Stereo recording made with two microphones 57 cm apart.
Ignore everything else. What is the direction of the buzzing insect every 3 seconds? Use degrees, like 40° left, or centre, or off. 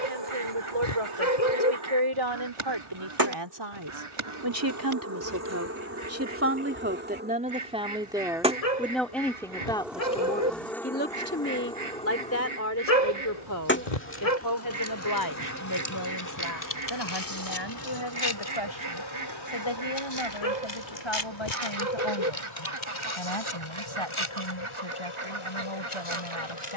40° right, 30° right, 20° right, centre, 20° left, 30° left, 40° left, 50° left, 50° left.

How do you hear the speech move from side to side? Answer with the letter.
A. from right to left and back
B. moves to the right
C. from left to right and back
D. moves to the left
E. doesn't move
D.